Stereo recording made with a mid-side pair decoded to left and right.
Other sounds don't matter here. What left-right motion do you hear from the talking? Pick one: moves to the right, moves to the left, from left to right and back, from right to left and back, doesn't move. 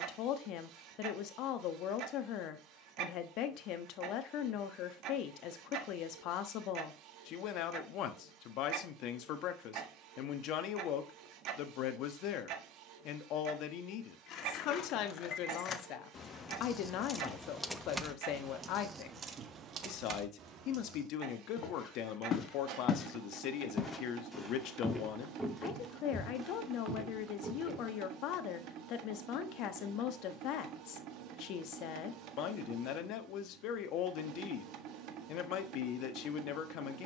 doesn't move.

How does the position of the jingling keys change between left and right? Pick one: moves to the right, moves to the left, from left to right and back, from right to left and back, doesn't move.
moves to the right.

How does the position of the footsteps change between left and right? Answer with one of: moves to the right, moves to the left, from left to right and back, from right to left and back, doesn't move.
moves to the right.